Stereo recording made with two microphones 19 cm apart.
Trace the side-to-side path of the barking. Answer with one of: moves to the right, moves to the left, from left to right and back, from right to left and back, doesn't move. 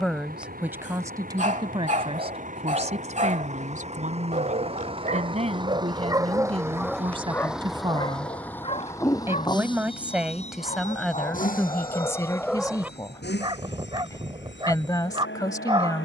from right to left and back.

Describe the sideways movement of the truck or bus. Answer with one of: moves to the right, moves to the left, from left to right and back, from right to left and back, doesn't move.
moves to the left.